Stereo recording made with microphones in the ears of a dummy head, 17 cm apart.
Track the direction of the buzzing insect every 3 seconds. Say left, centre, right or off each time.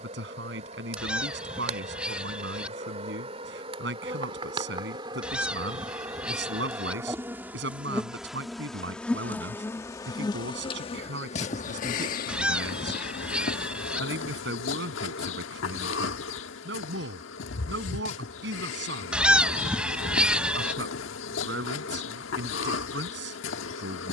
right, right, centre, left, left, left, left, left.